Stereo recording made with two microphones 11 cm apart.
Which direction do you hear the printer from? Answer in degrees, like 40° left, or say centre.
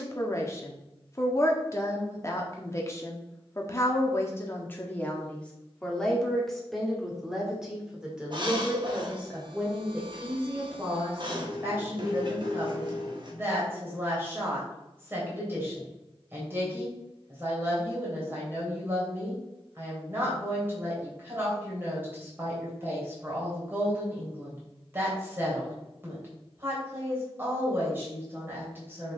50° right.